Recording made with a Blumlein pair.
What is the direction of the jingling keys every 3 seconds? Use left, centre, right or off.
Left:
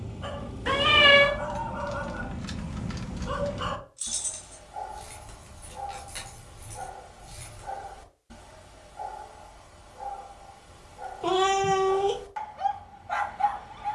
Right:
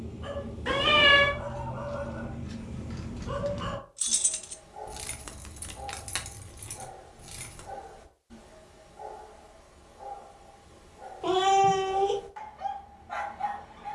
left, right, right, off, off.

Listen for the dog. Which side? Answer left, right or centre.
left.